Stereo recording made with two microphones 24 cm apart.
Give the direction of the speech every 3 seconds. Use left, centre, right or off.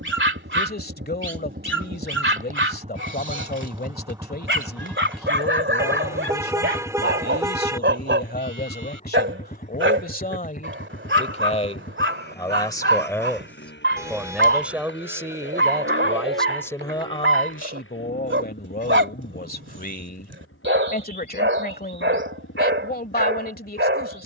left, left, left, left, centre, centre, left, left.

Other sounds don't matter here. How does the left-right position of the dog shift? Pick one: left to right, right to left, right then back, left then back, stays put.
stays put.